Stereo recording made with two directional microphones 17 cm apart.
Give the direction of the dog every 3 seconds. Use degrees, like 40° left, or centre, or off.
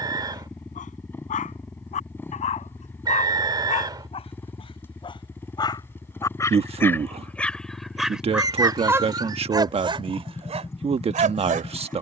40° left, 30° left, 10° left, 40° right.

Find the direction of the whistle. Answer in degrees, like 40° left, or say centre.
20° right.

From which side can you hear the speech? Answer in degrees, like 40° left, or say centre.
30° right.